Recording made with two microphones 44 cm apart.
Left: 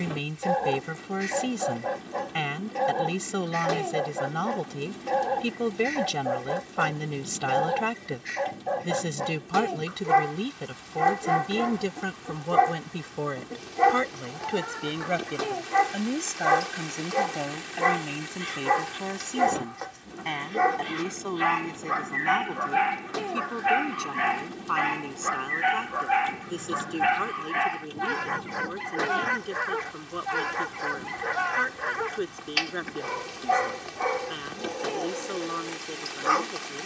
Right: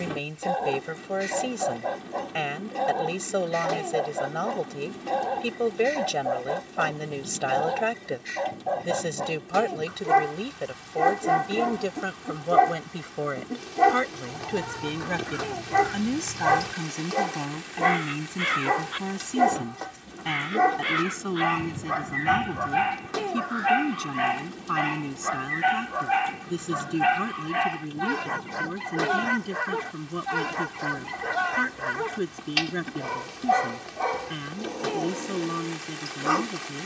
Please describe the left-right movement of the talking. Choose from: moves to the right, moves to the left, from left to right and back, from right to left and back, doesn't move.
moves to the right.